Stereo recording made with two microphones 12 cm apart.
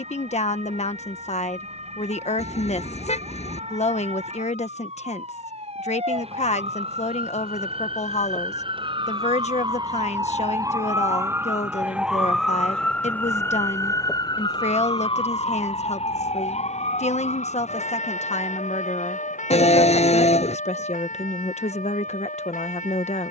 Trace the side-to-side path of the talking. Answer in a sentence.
In this clip you hear the talking stay in one place.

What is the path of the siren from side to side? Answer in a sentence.
In this clip you hear the siren travel towards the left.